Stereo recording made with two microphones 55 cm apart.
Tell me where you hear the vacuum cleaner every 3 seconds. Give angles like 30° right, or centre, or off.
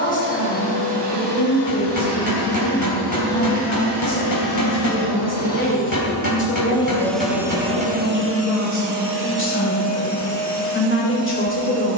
50° left, 30° left, 10° right, 60° right.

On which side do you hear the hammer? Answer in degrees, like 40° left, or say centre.
40° left.